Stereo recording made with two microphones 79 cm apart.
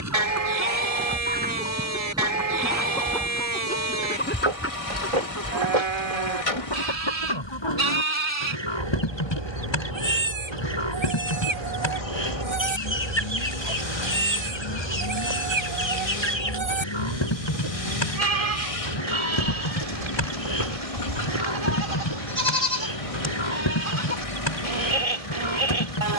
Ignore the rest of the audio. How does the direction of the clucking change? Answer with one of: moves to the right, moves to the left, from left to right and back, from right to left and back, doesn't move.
moves to the left.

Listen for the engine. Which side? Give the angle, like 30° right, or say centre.
40° left.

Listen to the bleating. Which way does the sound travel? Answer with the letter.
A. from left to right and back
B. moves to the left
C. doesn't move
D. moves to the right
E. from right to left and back
C.